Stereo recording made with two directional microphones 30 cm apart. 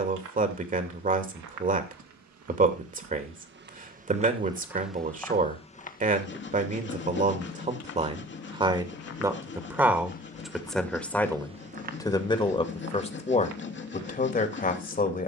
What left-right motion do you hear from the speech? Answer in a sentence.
In this clip you hear the speech move to the left.